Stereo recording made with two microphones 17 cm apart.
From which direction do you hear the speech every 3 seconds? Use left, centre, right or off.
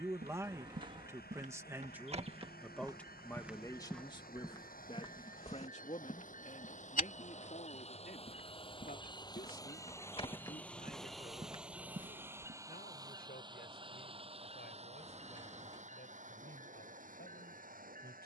centre, left, left, left, left, left.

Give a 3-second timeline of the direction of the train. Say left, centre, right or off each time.
left, left, left, centre, right, right.